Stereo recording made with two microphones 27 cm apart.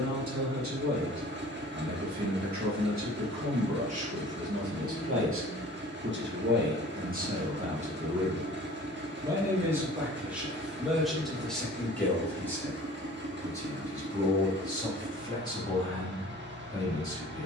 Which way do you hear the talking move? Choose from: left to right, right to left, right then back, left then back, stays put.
right to left.